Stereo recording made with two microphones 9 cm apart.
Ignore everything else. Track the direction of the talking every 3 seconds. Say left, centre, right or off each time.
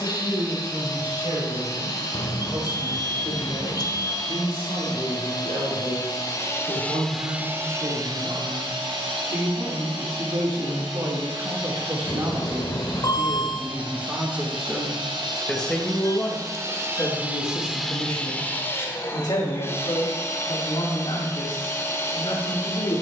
right, right, right, right, right, left, left, left.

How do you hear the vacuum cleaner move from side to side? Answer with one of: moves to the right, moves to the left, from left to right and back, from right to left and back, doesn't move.
from left to right and back.